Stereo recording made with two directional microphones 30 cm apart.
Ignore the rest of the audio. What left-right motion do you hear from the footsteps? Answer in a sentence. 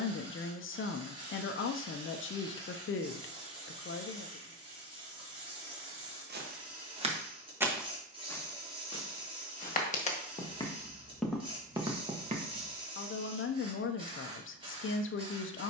In this clip you hear the footsteps go left and come back.